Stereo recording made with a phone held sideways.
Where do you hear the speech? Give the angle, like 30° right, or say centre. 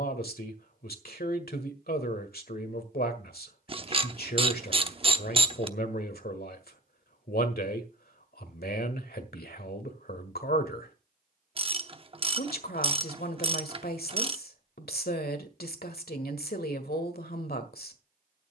80° left.